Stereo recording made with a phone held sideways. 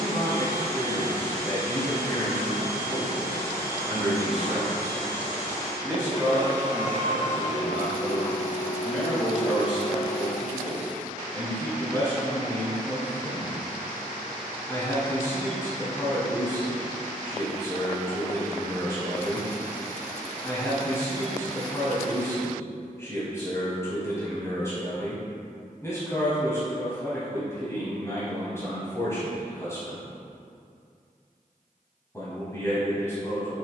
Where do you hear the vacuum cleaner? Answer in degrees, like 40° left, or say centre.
40° left.